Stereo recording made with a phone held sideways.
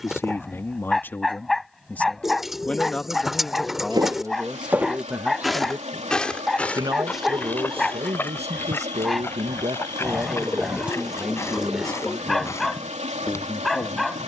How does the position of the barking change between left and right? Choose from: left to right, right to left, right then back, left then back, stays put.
stays put.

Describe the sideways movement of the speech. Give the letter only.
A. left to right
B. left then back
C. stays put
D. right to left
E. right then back
E.